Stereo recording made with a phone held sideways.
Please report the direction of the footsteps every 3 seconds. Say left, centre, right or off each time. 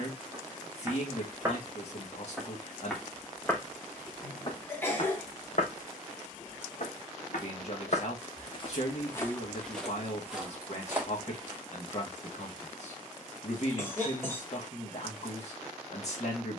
centre, left, left, centre, off, off.